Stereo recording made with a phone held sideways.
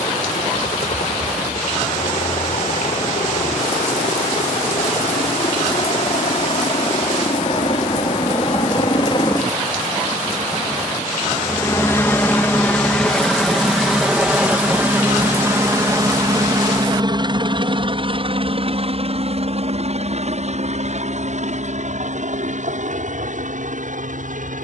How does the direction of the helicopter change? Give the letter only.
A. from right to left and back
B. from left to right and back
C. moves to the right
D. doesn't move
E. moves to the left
C.